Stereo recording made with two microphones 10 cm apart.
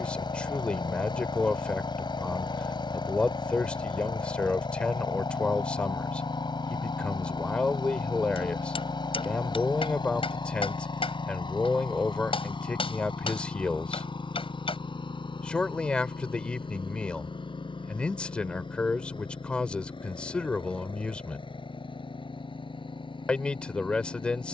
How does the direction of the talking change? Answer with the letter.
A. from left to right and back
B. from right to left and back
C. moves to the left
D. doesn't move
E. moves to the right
D.